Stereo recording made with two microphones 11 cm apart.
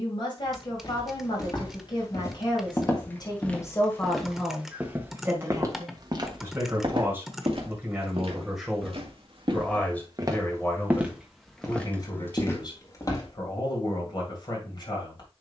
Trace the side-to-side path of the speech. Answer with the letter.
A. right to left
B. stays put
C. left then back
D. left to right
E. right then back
E.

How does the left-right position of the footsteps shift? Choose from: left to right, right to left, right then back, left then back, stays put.
right then back.